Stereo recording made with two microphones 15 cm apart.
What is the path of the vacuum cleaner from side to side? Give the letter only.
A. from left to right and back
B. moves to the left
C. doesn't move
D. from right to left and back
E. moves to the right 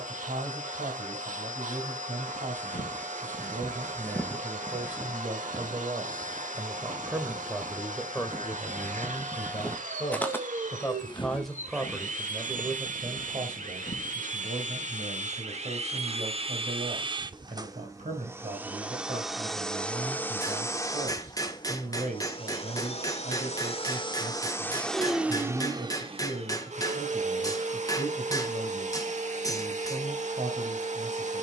D.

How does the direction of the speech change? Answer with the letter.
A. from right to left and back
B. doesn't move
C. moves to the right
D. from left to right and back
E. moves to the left
A.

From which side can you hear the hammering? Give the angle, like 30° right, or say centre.
20° left.